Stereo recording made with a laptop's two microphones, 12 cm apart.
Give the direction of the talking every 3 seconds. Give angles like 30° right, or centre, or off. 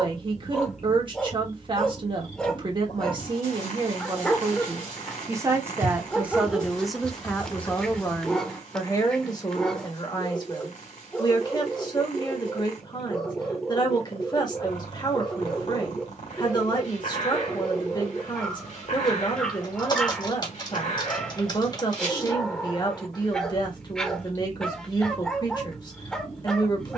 40° right, 40° right, 10° left, 40° left, 40° left, 40° left, 40° left, 40° left, 40° left.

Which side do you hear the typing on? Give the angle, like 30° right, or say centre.
40° left.